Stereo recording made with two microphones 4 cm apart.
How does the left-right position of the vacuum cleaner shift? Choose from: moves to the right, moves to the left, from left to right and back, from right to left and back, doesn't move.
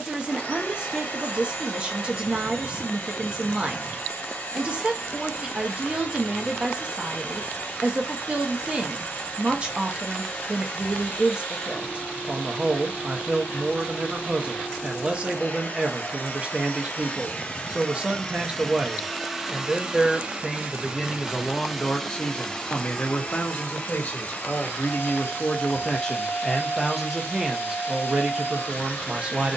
from left to right and back.